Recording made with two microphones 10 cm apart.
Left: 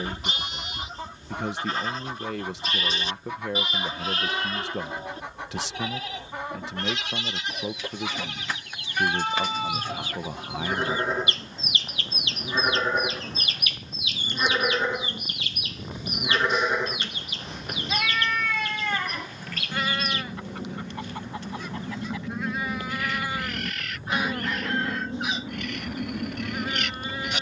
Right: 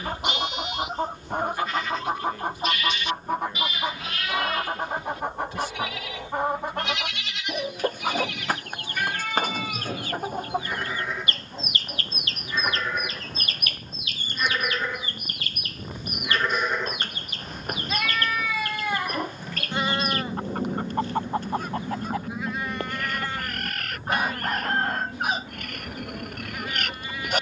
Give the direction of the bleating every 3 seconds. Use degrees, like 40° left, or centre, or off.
30° left, 30° left, 30° left, 30° left, 30° left, 10° left, 20° right, 10° right, 30° left.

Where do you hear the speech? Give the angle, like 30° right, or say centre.
80° left.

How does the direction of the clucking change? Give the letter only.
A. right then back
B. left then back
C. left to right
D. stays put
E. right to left
D.